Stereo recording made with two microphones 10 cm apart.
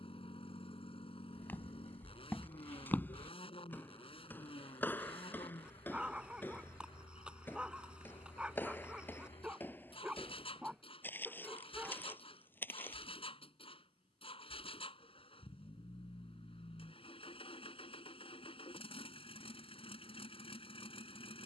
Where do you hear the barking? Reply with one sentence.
You can hear the barking in the centre.